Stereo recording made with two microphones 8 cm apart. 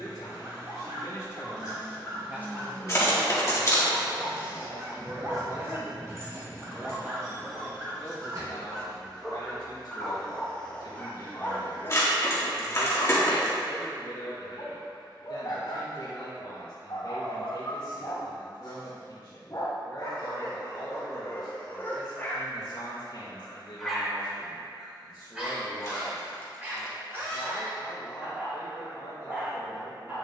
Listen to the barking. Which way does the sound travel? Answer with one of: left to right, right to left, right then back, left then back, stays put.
left then back.